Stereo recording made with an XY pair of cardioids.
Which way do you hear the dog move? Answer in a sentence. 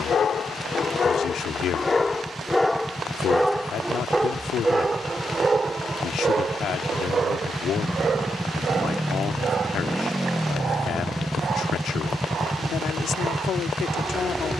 In this clip you hear the dog move from left to right.